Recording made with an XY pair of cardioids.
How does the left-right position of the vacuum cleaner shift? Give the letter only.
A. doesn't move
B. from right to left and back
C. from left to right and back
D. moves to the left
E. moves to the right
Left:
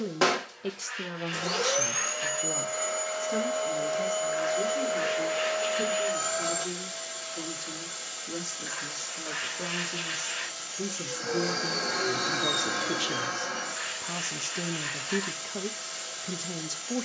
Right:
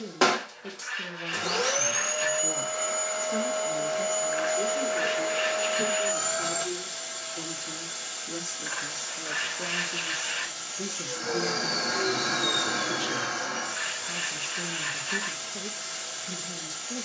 A.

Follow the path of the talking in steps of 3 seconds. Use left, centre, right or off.
left, centre, centre, centre, left, left.